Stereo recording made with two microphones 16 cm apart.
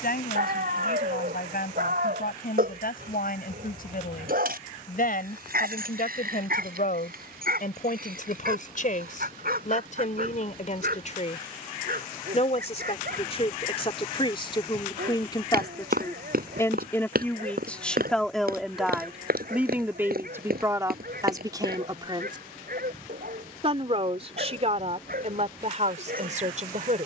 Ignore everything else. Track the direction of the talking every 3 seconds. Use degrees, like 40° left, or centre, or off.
70° left, 70° left, 60° left, 50° left, 40° left, 20° left, 10° right, 30° right, 50° right.